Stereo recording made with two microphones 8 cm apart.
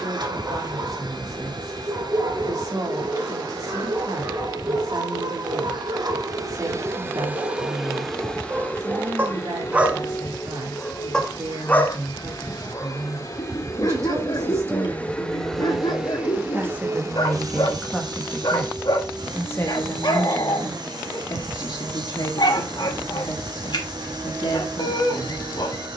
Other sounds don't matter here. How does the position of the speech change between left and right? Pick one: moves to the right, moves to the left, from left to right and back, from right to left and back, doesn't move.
moves to the left.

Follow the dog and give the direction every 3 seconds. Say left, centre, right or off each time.
right, right, right, centre, left, left, left, left, left.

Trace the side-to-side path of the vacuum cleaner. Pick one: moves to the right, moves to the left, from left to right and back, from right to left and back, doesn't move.
from right to left and back.